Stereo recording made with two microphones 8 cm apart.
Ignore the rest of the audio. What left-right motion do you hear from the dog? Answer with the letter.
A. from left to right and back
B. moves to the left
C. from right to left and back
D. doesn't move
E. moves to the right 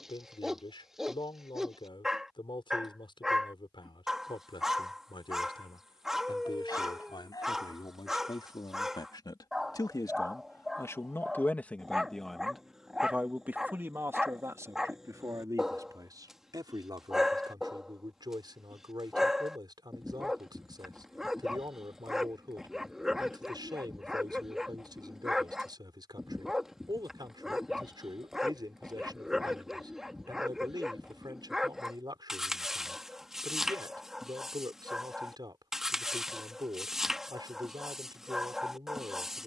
D.